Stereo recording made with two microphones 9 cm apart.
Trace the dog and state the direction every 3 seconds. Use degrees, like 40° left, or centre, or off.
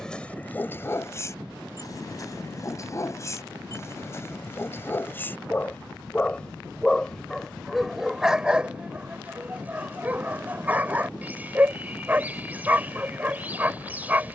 30° left, 30° left, centre, 20° right, 20° right.